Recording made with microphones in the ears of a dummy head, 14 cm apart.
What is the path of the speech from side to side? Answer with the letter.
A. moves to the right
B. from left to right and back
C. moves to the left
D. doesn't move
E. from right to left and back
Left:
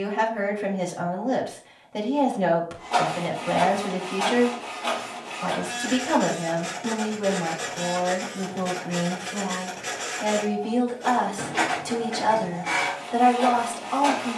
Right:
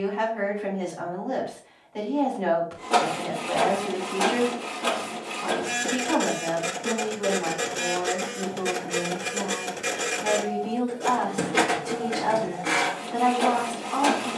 D.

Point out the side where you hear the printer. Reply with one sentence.
In this clip you hear the printer on the right.